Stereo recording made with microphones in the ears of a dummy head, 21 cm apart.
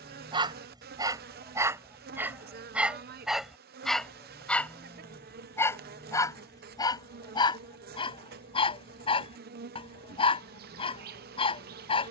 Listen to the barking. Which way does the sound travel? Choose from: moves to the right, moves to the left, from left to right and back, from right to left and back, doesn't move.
moves to the left.